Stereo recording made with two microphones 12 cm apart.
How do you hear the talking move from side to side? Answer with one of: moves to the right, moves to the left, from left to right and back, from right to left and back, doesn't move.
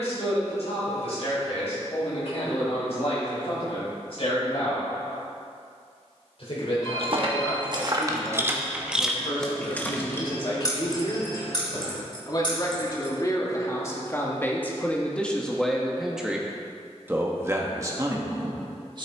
moves to the right.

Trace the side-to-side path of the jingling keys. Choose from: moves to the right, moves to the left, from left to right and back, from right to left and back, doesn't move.
moves to the left.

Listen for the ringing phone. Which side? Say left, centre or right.
left.